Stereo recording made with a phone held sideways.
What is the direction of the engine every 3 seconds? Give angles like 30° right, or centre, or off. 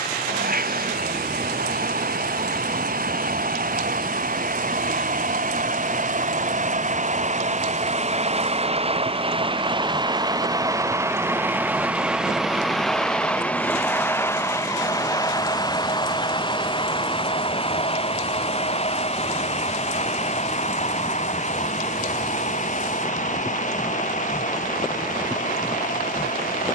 80° right, 70° right, 50° right, 20° right, 10° left, 30° left, 40° left, 50° left, 60° left.